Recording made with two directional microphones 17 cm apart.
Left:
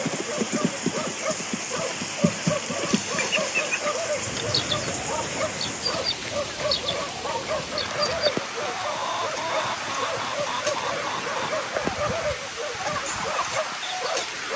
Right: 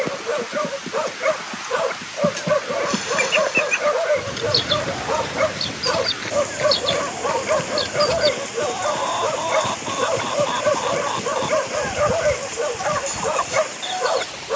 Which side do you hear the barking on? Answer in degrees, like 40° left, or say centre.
50° right.